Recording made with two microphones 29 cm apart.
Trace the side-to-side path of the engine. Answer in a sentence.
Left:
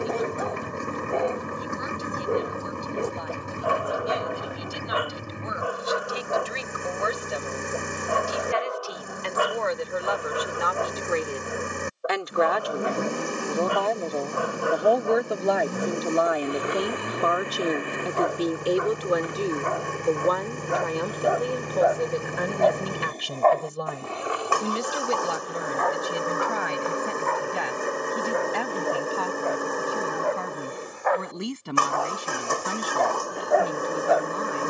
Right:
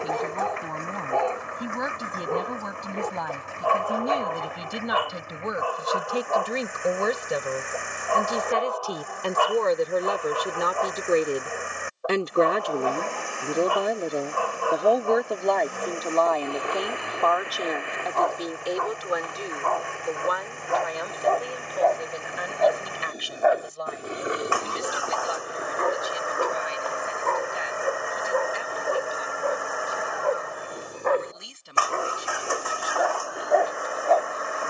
You can hear the engine stay put.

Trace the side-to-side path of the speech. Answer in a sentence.
In this clip you hear the speech go from the right side to the left.